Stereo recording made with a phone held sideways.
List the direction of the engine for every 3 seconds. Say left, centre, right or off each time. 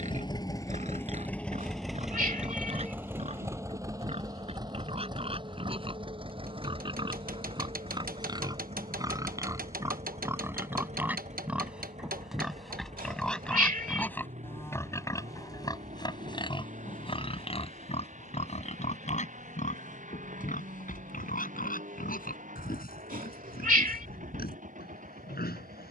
centre, right, right, right, right, right, right, right, right.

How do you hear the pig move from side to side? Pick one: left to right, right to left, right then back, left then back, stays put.
right to left.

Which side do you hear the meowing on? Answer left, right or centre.
right.